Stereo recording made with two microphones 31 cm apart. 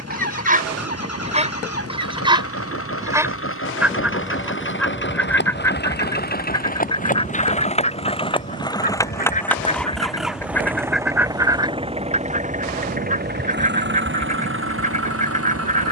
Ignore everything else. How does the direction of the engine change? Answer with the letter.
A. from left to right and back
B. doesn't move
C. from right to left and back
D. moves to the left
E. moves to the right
E.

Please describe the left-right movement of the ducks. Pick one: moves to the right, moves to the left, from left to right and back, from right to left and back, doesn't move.
from right to left and back.